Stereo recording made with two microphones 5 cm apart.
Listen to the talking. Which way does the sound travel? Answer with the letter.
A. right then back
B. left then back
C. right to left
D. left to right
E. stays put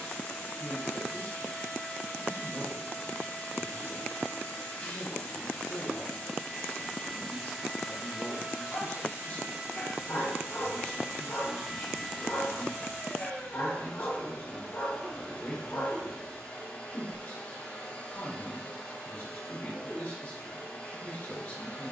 E.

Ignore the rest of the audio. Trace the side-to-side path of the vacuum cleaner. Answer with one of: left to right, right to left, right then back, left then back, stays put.
right then back.